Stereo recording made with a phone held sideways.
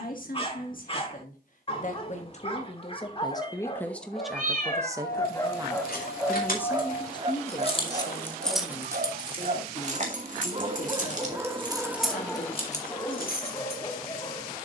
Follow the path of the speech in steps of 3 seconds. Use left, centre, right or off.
left, centre, left, left, left.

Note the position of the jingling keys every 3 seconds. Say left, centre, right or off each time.
off, left, left, right, left.